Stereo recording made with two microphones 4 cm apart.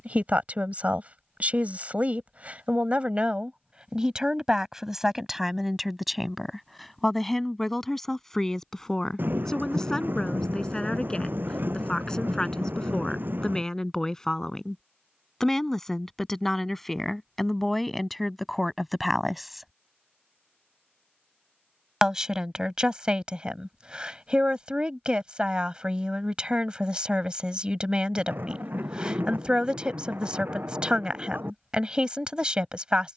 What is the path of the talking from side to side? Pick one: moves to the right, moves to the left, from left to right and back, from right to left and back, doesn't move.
from right to left and back.